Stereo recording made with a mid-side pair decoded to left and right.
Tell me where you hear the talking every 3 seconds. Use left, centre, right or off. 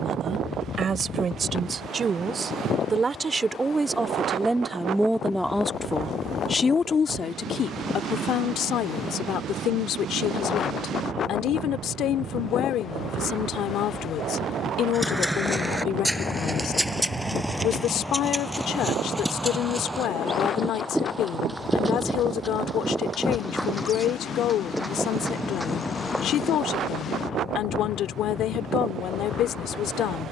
right, centre, left, left, left, left, left, left, left, left.